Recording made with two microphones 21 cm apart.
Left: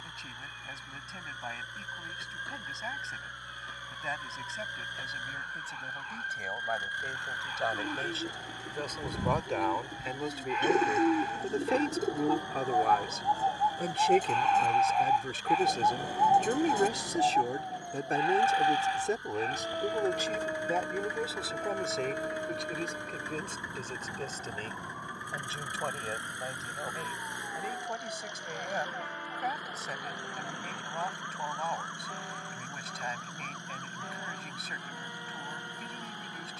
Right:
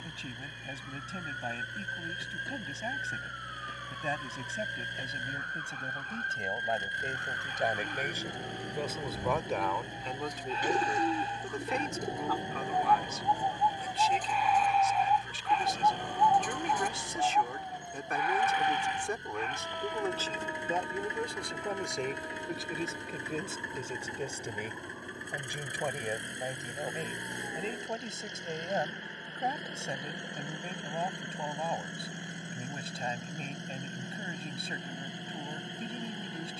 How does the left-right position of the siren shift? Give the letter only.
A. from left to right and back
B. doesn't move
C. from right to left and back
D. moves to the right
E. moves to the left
E.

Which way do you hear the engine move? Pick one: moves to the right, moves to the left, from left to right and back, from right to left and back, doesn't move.
doesn't move.